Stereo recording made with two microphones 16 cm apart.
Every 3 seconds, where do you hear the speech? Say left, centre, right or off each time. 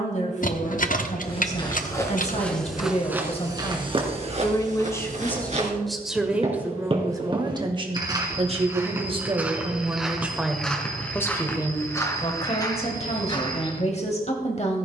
left, left, right, centre, left.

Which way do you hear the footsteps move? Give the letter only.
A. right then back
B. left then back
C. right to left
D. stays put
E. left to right
A.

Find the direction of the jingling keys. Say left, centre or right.
left.